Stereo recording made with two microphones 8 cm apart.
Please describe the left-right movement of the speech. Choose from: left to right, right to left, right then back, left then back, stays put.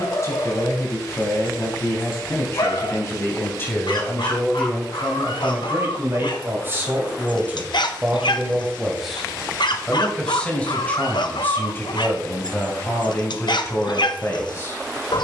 right then back.